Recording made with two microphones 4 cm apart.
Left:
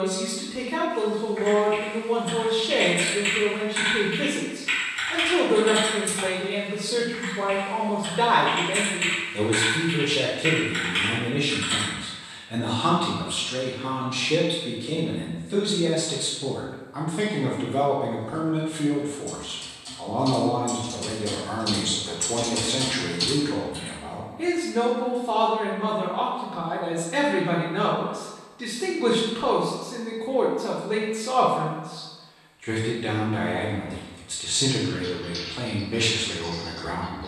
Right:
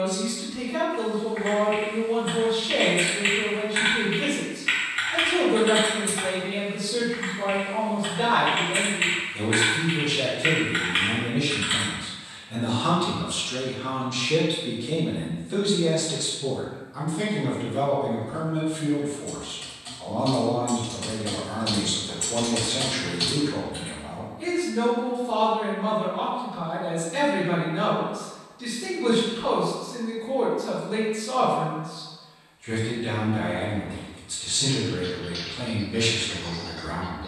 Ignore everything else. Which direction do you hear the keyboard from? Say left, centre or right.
right.